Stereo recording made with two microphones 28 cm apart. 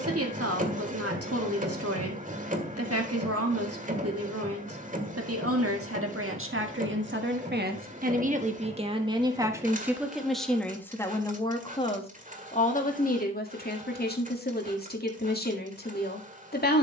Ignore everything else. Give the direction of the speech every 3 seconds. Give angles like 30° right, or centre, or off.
60° right, 60° right, 40° right, centre, 30° left, 30° left.